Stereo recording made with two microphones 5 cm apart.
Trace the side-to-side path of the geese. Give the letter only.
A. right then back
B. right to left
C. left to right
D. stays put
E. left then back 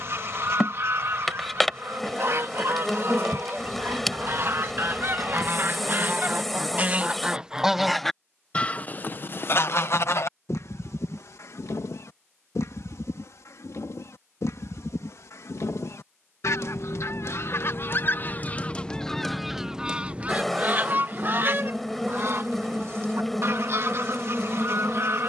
E.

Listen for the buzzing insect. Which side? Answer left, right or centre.
centre.